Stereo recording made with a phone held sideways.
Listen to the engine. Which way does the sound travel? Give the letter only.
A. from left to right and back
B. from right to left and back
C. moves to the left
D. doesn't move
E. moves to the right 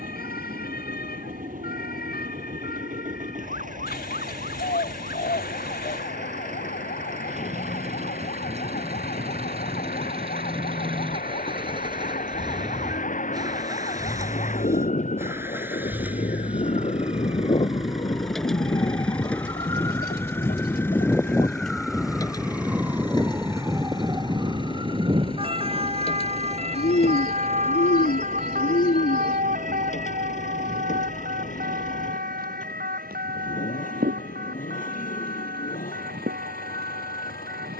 C.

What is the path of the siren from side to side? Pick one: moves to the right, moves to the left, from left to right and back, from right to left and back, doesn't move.
moves to the right.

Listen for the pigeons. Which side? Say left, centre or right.
left.